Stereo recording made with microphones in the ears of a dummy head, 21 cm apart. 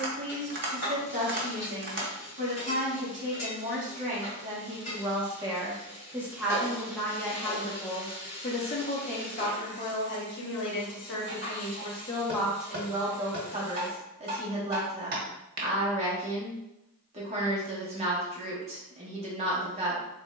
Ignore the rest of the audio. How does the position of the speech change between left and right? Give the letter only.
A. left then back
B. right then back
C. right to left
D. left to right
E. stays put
A.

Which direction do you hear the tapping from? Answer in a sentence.
You can hear the tapping on the right.